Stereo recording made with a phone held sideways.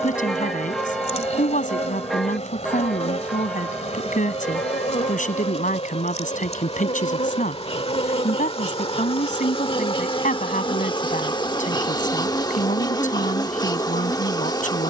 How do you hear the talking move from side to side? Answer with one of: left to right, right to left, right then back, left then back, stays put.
stays put.